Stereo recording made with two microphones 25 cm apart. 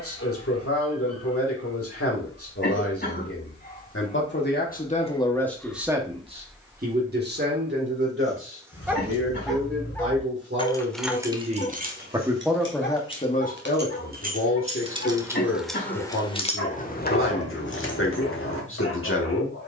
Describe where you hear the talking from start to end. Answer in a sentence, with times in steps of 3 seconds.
In this clip you hear the talking on the left from 0 s, on the right from 6 s and on the left from 12 s.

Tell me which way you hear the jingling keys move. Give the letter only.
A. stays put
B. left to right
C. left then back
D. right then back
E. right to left
D.